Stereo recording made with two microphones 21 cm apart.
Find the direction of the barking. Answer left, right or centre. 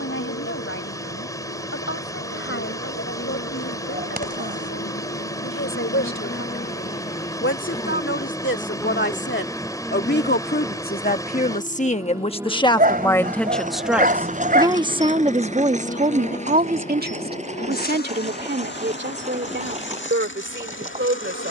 right.